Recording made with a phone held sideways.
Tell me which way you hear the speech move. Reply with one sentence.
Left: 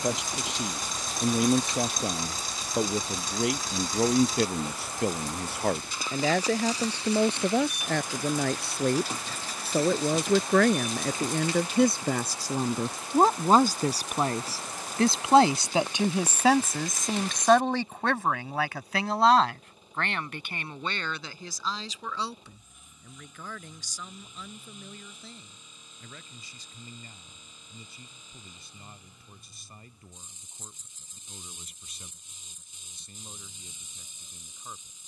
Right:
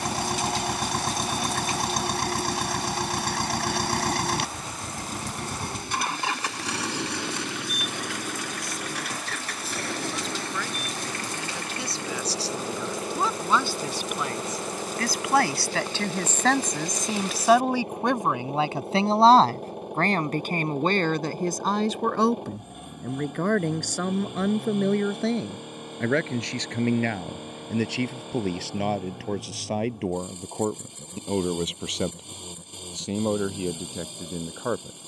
You can hear the speech move to the right.